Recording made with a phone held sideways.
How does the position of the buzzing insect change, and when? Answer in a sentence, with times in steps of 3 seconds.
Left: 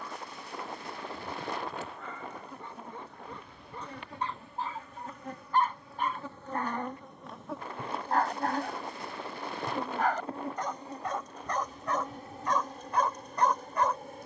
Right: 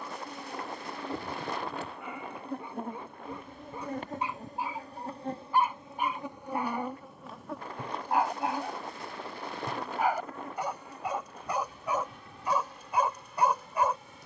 In this clip you hear the buzzing insect on the right from 0 s, in the centre from 6 s and on the left from 9 s.